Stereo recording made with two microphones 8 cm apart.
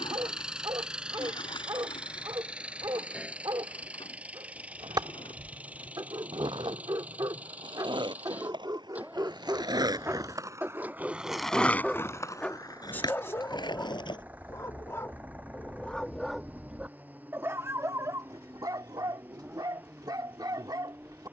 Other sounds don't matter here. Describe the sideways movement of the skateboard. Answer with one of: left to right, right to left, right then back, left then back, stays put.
right to left.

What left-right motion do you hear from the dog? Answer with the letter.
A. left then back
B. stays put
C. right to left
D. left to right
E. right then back
A.